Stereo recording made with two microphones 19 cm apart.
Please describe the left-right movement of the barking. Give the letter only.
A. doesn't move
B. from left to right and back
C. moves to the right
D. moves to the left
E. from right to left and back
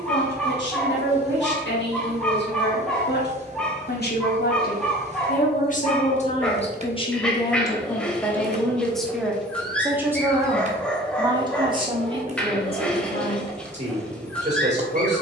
A.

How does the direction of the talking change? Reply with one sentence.
In this clip you hear the talking move from left to right.